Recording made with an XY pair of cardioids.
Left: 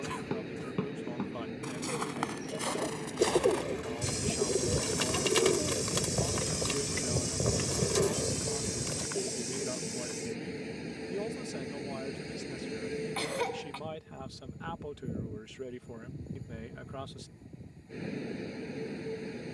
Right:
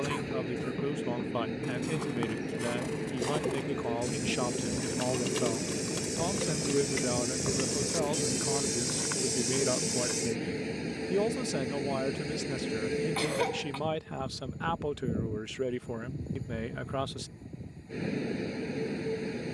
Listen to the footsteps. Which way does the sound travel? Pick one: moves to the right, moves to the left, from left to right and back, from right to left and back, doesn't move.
moves to the right.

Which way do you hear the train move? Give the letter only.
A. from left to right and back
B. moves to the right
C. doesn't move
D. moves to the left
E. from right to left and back
C.